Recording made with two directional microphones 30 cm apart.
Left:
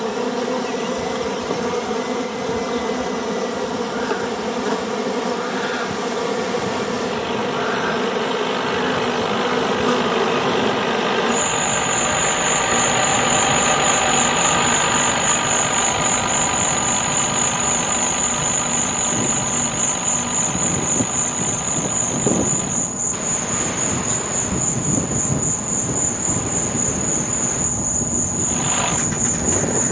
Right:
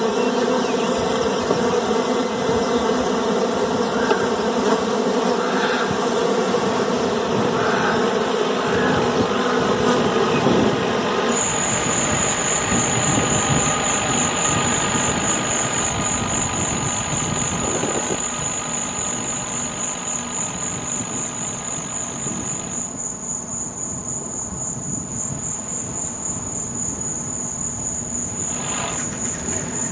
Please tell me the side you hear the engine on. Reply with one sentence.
You can hear the engine on the left.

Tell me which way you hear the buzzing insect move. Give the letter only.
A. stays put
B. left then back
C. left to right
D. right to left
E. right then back
D.